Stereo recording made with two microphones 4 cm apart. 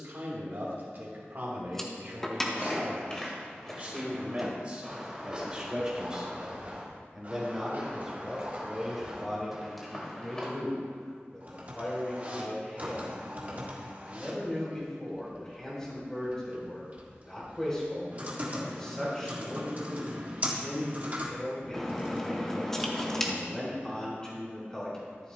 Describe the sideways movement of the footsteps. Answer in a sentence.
In this clip you hear the footsteps move from left to right and back again.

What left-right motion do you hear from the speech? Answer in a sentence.
In this clip you hear the speech move from right to left.